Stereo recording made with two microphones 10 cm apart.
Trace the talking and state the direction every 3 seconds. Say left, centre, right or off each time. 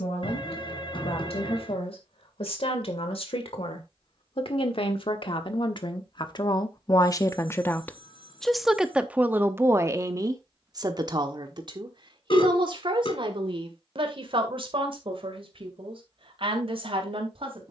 left, left, left, right, right, right.